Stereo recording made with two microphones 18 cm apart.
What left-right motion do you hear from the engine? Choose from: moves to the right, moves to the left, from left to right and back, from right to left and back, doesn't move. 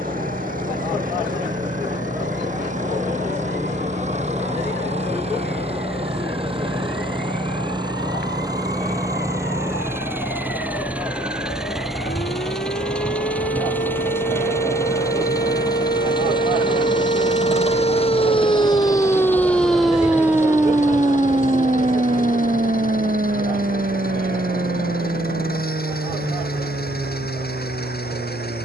moves to the left.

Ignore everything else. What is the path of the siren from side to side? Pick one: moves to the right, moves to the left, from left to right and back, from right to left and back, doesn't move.
moves to the right.